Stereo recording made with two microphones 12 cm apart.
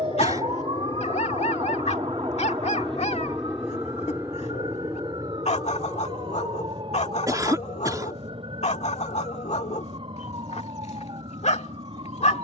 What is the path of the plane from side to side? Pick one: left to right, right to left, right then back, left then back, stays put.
left to right.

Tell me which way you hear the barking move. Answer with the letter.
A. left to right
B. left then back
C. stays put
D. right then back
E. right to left
C.